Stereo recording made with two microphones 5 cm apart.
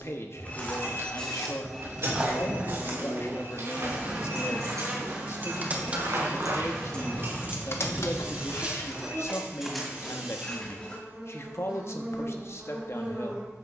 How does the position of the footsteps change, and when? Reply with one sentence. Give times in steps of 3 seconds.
You can hear the footsteps in the centre from 0 s, on the right from 3 s, in the centre from 9 s and not at all from 12 s.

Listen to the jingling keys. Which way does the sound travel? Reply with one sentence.
You can hear the jingling keys move to the left.